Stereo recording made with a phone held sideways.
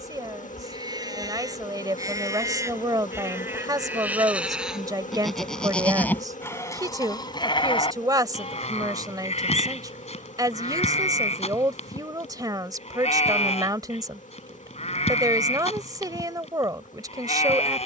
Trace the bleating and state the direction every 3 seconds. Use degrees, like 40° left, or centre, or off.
30° right, 10° right, 40° left, 60° left, 60° left, 60° left.